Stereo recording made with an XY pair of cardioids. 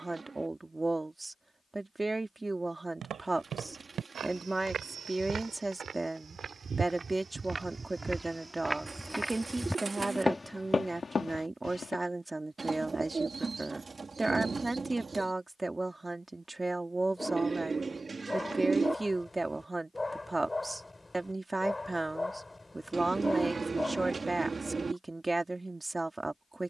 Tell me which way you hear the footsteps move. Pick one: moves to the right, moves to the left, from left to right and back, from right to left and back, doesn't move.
moves to the left.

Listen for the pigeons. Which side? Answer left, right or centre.
right.